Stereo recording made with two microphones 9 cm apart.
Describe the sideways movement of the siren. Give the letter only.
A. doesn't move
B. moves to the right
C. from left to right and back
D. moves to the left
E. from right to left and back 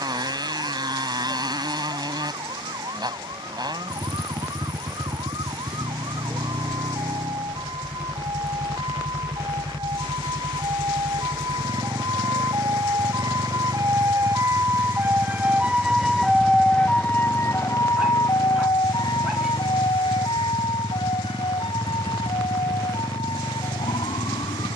D.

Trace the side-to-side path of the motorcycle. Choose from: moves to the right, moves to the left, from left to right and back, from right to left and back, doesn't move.
doesn't move.